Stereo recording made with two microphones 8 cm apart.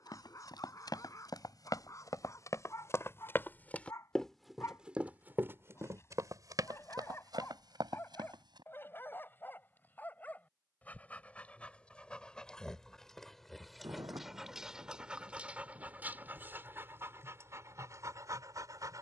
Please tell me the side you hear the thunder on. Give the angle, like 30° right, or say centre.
40° right.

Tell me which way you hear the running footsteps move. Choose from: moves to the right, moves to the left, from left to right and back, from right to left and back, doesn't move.
moves to the right.